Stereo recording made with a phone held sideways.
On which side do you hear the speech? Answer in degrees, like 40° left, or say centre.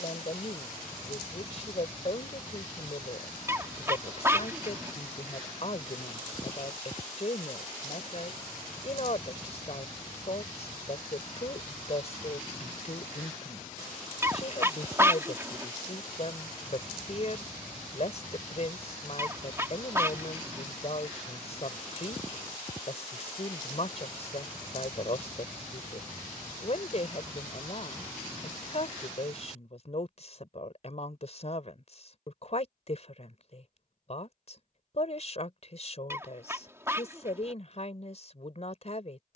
50° left.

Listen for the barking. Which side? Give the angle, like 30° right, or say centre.
20° right.